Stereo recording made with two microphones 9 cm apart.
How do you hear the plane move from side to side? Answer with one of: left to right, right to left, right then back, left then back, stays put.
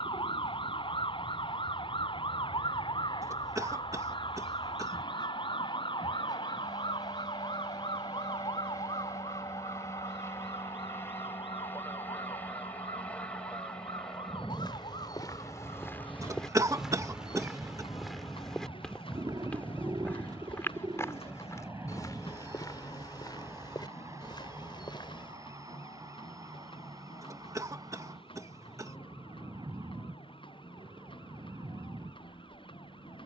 left to right.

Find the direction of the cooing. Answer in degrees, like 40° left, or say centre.
50° right.